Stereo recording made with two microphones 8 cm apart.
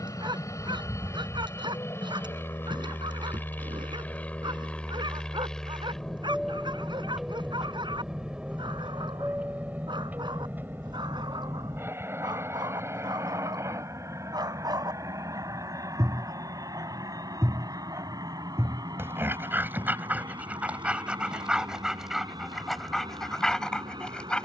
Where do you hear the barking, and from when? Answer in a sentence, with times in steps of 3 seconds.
In this clip you hear the barking on the right from 0 s and in the centre from 21 s.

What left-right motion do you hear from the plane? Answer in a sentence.
In this clip you hear the plane move from left to right.